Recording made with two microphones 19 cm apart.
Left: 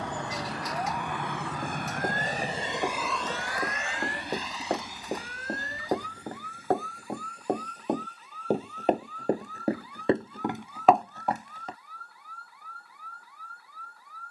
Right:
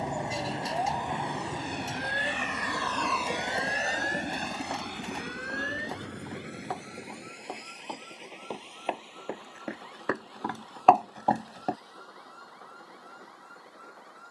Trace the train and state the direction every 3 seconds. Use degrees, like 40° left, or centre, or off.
60° left, 50° right, 70° right, 80° right, 80° right.